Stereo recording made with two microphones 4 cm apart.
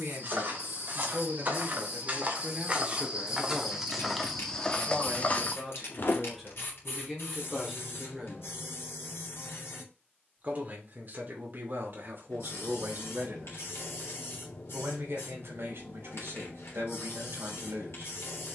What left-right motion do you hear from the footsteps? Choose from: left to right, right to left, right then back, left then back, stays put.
right to left.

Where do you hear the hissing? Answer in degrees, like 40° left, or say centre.
70° left.